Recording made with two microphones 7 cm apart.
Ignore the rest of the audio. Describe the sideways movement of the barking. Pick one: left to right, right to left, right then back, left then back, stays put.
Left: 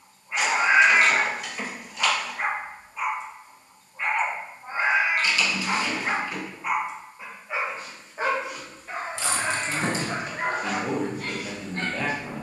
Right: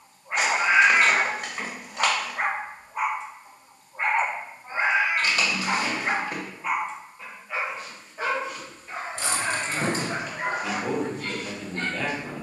right to left.